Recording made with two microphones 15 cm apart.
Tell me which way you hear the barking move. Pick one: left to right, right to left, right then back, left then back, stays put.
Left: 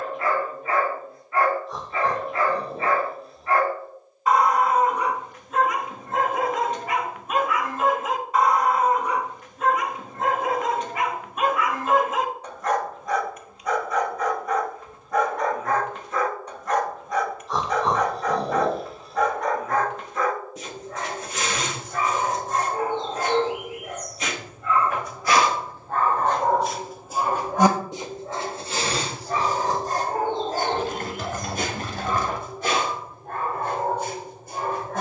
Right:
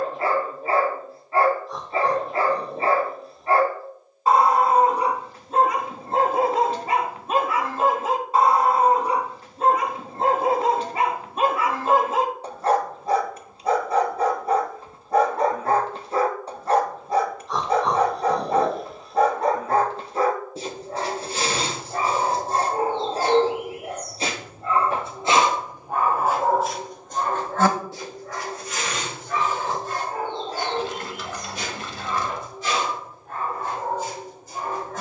right to left.